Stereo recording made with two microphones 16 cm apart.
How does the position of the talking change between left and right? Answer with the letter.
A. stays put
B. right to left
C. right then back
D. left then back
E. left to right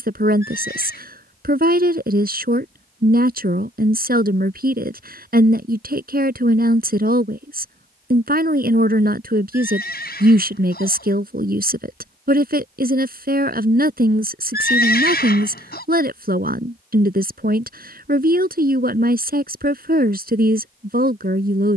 A.